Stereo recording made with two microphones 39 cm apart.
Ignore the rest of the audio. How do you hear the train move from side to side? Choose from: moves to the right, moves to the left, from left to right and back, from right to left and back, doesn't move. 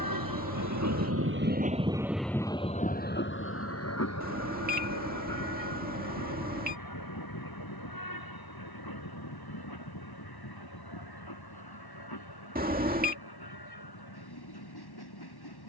moves to the left.